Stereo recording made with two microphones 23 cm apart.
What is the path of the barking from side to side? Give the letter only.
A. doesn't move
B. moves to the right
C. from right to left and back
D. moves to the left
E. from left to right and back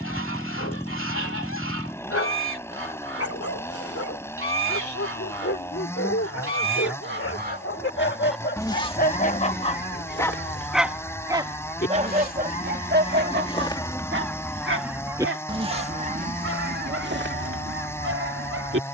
B.